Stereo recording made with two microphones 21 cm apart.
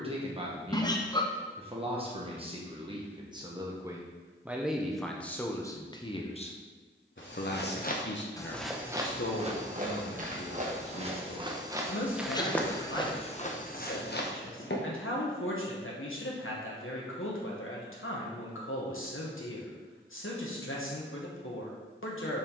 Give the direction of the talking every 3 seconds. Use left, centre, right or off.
right, centre, left, left, left, left, left, left.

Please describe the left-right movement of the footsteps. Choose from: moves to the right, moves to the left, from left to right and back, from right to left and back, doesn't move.
from left to right and back.